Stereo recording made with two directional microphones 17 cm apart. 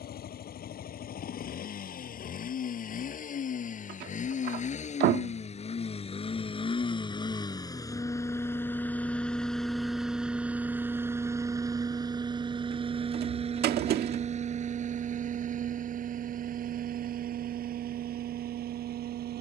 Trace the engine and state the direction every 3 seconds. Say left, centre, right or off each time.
left, left, left, centre, right, right, right.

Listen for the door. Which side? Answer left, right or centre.
right.